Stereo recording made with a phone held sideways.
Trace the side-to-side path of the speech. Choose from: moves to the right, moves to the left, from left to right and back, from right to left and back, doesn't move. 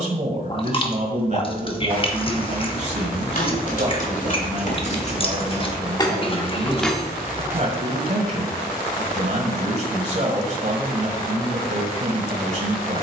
doesn't move.